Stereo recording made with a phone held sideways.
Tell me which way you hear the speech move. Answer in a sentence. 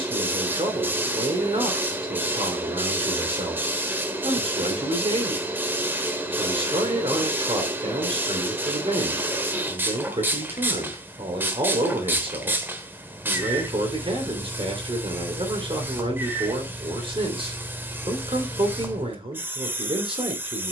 You can hear the speech stay put.